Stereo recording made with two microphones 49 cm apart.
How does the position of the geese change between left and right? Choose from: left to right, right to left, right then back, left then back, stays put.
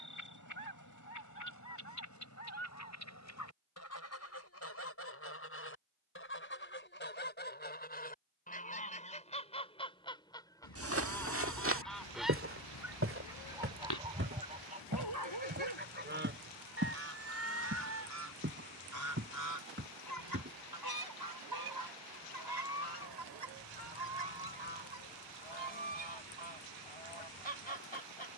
left to right.